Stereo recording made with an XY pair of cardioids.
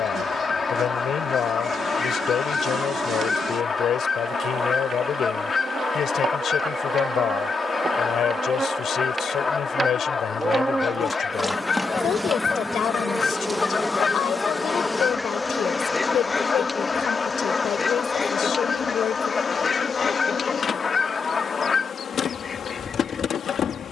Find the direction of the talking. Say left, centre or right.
left.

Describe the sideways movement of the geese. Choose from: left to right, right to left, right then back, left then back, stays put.
stays put.